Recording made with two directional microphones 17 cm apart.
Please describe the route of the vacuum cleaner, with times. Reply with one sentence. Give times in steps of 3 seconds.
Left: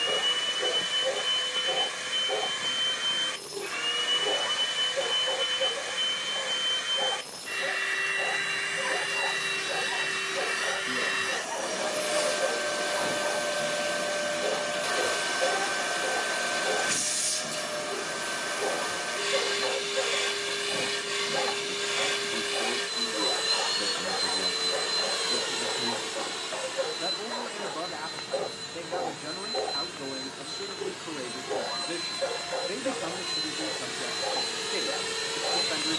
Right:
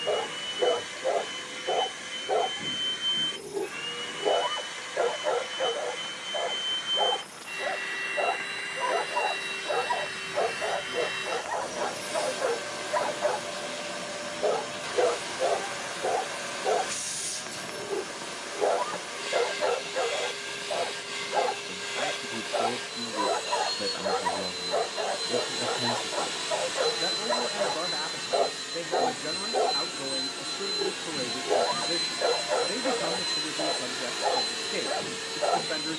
In this clip you hear the vacuum cleaner on the left from 0 s, in the centre from 24 s, on the right from 27 s and in the centre from 33 s.